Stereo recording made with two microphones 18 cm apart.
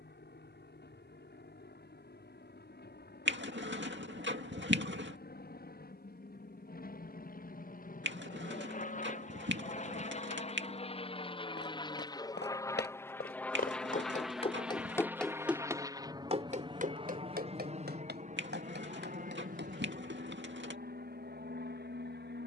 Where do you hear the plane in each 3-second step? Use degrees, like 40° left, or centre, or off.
70° left, 60° left, 50° left, 40° left, 10° left, 20° right, 40° right, 50° right.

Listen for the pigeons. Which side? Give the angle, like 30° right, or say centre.
70° right.